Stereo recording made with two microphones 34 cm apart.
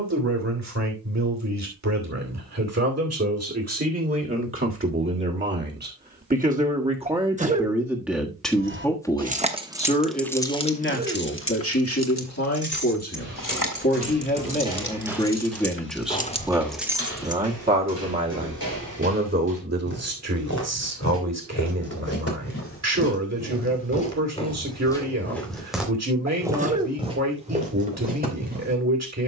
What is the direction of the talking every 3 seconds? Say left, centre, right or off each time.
right, right, centre, left, left, centre, right, right, right, right.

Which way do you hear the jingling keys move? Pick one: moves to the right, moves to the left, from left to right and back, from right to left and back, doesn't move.
from right to left and back.